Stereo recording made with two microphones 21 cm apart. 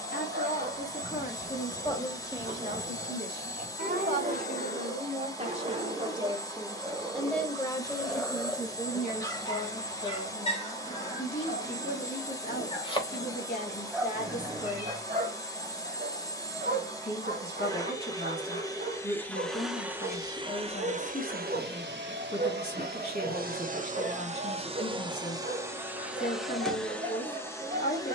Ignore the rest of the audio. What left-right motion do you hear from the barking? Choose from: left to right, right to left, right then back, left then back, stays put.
left then back.